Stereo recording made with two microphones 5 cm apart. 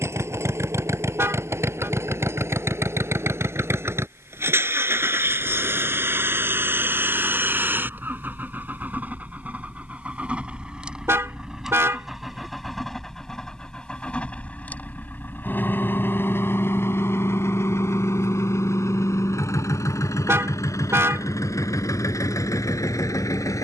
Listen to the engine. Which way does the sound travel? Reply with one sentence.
In this clip you hear the engine go from the right side to the left.